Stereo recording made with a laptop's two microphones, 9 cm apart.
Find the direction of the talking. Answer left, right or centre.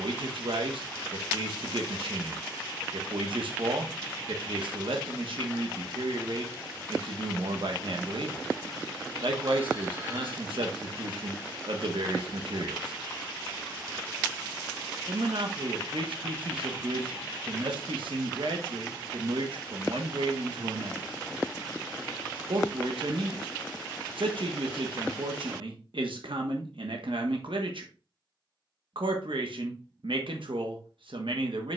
right.